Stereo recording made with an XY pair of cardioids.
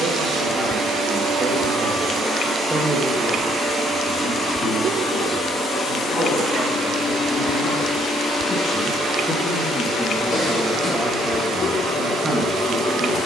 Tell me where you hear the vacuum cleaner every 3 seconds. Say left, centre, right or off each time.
right, centre, left, left, left.